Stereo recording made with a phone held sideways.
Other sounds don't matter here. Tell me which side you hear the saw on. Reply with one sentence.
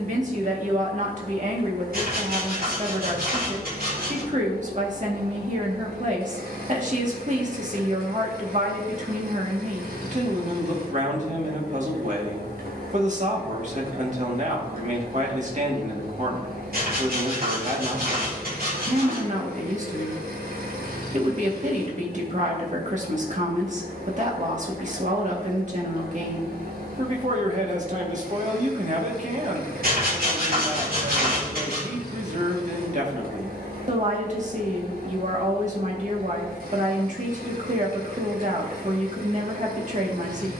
You can hear the saw on the right.